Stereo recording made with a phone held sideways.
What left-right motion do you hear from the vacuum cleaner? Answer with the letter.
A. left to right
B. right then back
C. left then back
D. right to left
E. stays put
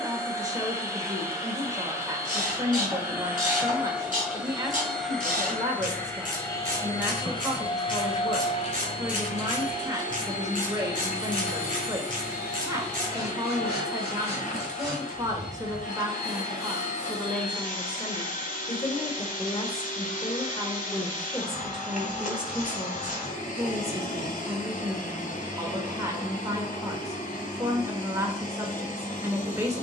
D.